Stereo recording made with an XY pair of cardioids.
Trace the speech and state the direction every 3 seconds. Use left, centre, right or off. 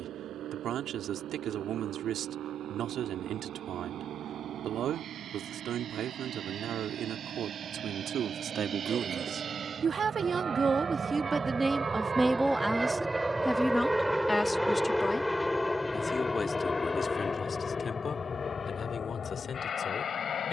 right, right, right, right, centre, left, left.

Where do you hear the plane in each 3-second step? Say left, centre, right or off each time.
right, right, right, right, centre, left, left.